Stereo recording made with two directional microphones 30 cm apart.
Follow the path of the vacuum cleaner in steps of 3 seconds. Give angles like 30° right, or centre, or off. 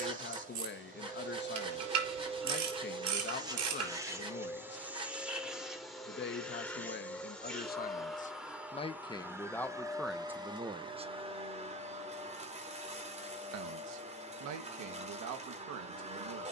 20° right, 10° right, centre, 10° right, 20° right, 20° right.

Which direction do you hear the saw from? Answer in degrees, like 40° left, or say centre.
20° right.